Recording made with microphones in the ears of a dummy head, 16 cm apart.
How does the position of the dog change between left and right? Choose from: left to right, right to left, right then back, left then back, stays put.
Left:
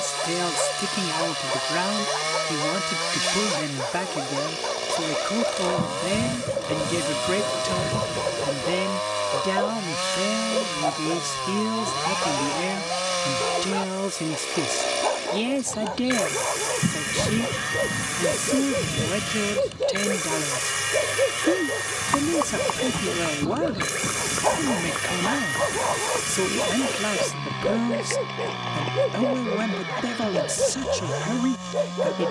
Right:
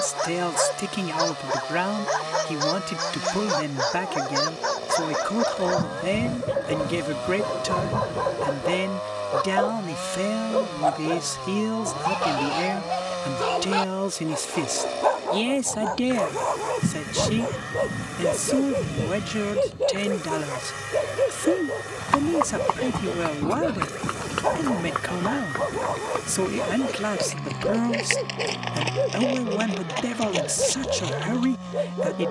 right to left.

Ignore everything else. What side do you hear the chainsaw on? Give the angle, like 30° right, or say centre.
60° left.